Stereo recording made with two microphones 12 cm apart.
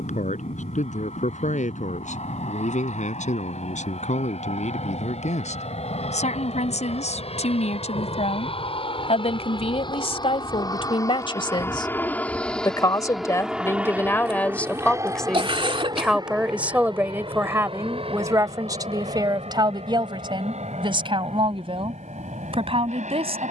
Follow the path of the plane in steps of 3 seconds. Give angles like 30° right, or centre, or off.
80° left, 70° left, 60° left, 30° left, 10° right, 40° right, 50° right, 60° right.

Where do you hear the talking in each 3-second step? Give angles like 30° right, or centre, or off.
80° left, 70° left, 60° left, 50° left, 20° left, 10° right, 30° right, 50° right.